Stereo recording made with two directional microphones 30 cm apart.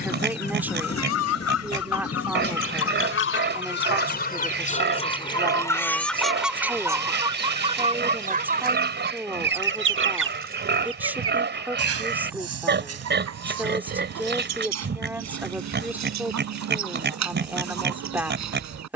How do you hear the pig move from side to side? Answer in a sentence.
You can hear the pig stay put.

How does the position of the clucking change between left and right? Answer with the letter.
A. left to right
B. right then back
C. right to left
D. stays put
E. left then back
A.